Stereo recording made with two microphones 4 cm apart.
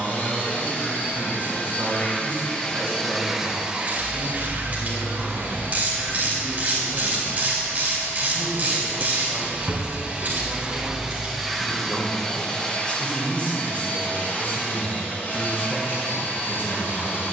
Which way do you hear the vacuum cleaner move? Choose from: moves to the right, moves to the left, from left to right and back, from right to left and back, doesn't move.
from left to right and back.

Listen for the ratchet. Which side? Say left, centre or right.
right.